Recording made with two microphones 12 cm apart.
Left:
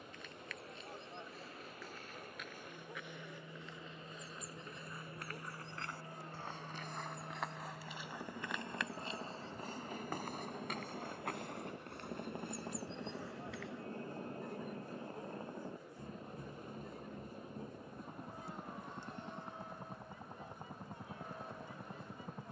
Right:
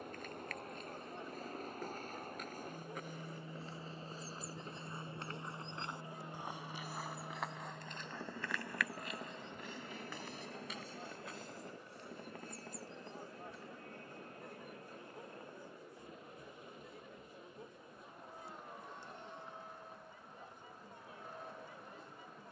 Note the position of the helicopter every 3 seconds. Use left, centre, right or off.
right, right, centre, centre, left, left, left, left.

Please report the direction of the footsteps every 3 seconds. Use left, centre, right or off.
right, right, centre, left, left, off, off, off.